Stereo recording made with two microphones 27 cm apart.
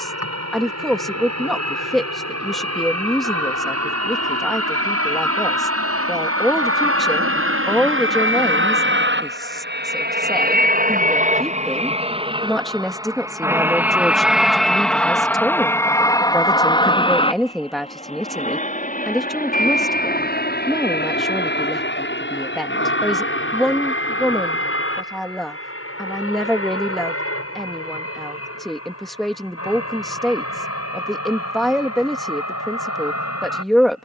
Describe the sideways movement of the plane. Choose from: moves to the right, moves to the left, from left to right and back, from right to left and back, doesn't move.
moves to the left.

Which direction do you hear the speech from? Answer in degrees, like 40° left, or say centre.
centre.